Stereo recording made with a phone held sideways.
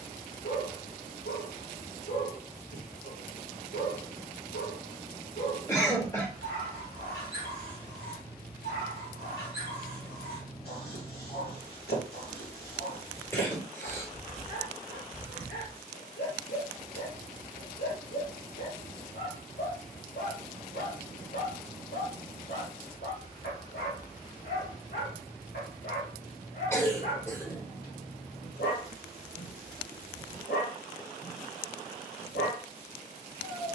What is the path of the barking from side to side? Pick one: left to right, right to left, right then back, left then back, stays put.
stays put.